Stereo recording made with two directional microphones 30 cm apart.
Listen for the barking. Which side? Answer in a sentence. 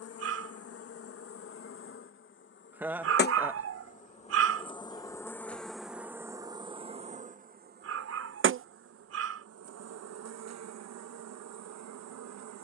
You can hear the barking on the right.